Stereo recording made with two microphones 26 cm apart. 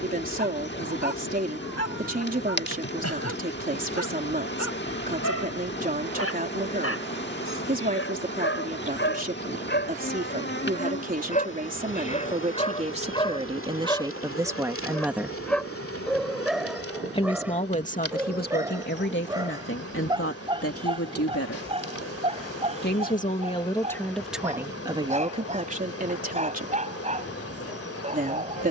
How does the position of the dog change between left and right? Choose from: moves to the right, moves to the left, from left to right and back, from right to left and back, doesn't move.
moves to the right.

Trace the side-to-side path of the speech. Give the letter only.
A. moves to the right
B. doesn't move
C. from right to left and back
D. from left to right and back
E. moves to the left
C.